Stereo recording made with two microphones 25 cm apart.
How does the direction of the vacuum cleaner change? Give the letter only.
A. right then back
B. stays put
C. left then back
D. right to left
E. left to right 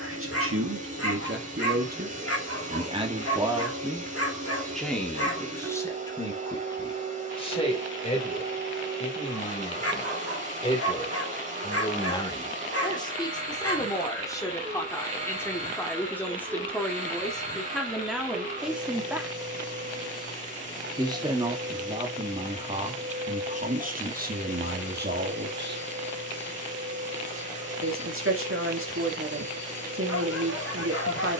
B.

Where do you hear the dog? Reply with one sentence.
In this clip you hear the dog on the left.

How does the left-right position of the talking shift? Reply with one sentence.
In this clip you hear the talking go left and come back.